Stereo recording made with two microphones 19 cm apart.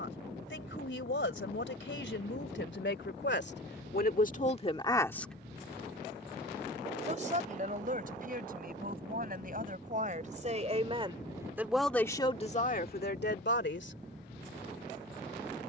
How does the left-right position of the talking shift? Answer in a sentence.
You can hear the talking go right and come back.